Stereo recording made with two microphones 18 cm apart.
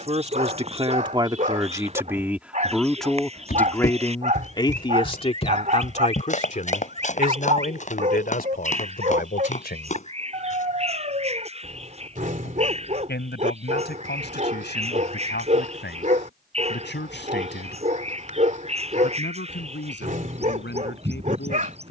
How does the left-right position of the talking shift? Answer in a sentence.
In this clip you hear the talking go from the right side to the left.